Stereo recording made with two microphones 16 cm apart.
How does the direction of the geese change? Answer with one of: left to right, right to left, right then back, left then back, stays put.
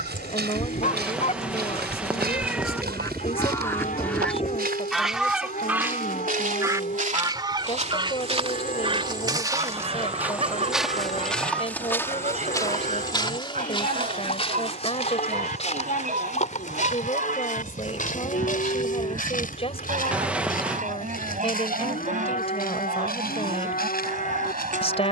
left to right.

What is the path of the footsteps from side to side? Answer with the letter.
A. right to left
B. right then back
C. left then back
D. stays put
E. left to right
A.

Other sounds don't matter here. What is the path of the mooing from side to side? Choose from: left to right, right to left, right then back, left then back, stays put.
stays put.